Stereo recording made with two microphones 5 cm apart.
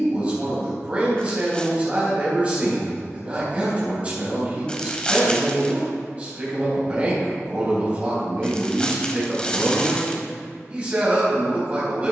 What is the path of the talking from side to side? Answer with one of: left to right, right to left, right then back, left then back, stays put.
stays put.